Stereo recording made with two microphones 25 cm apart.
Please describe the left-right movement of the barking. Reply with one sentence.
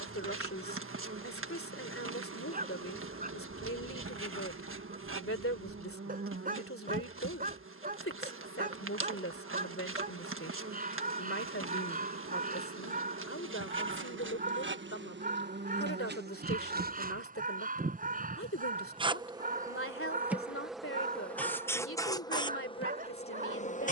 You can hear the barking stay put.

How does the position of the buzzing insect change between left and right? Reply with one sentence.
In this clip you hear the buzzing insect travel towards the left.